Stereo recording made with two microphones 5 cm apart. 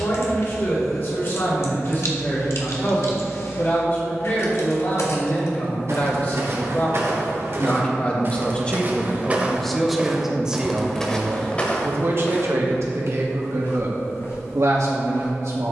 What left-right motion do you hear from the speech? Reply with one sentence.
In this clip you hear the speech move to the right.